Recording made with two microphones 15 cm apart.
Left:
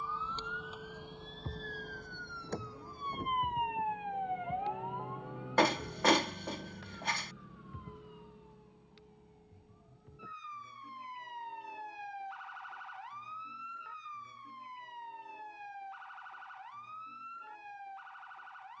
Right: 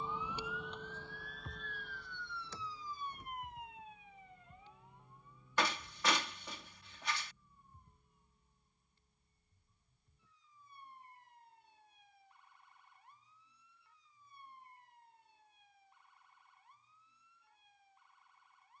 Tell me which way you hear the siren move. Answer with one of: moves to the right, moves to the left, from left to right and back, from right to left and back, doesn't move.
moves to the left.